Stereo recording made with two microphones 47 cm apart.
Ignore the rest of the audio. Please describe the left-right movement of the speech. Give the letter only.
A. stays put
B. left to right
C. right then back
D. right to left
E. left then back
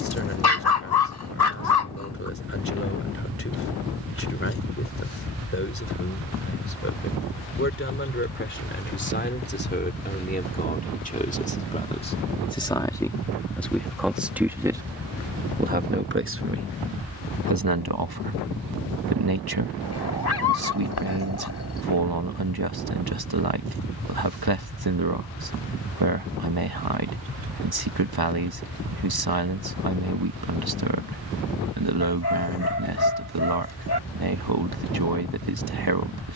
B.